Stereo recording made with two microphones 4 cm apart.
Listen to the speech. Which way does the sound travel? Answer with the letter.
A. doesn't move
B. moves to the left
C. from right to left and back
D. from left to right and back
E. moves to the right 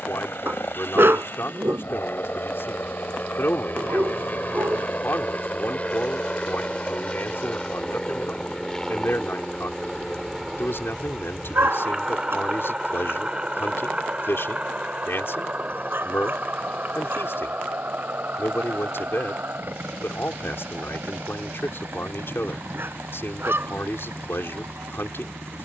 A.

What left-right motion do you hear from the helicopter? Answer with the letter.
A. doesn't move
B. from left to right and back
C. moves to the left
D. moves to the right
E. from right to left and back
D.